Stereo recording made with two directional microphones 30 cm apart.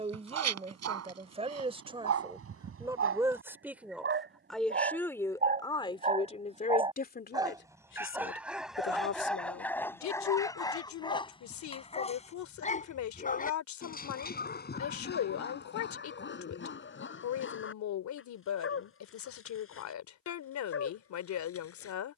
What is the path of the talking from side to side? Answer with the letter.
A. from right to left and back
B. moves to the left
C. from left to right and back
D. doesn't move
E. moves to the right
B.